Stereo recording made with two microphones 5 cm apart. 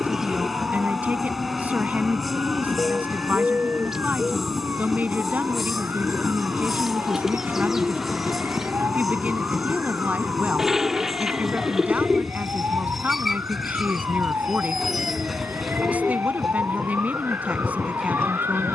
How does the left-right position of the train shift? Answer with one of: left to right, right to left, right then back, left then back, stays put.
stays put.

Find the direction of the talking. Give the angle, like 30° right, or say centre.
30° right.